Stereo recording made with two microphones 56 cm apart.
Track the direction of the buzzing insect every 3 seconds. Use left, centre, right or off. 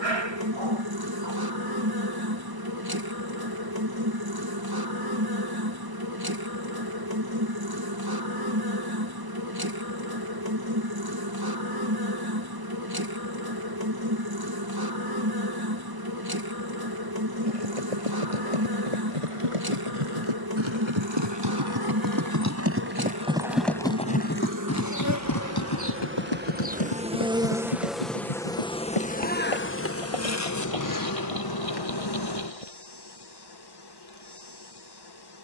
right, right, right, right, right, right, right, right, right, centre, left, left.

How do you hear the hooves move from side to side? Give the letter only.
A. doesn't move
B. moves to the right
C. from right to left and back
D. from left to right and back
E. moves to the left
E.